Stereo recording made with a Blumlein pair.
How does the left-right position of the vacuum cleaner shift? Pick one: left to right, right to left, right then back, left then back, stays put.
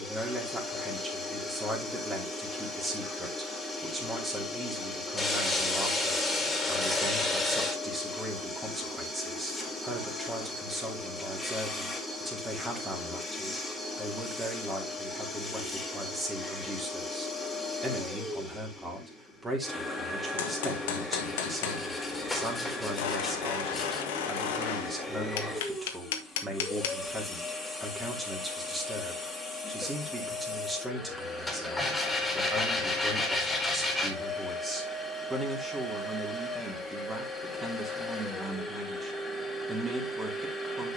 stays put.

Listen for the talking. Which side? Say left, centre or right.
centre.